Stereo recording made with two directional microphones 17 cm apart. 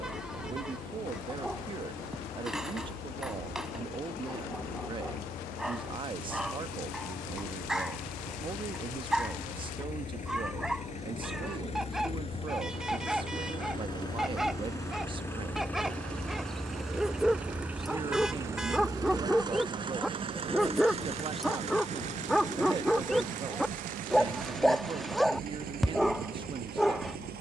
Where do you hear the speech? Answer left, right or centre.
right.